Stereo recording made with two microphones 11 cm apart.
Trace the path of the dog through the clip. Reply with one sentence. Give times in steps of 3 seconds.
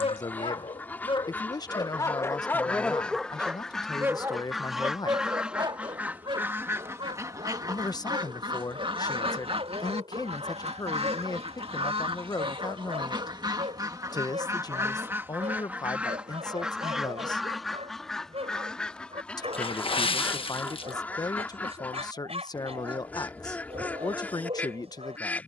In this clip you hear the dog on the left from 0 s and on the right from 3 s.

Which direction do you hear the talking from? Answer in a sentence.
You can hear the talking on the left.